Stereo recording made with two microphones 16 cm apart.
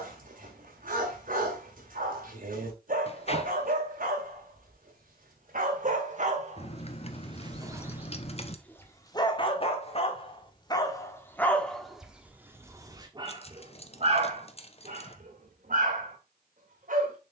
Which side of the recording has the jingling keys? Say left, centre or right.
left.